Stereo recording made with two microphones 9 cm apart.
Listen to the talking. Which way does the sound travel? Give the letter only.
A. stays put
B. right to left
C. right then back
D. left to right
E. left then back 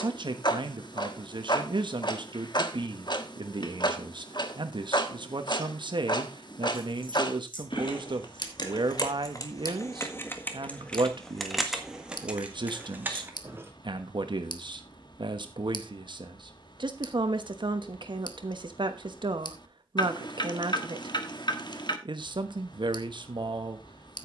A.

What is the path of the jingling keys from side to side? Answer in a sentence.
You can hear the jingling keys go from the left side to the right.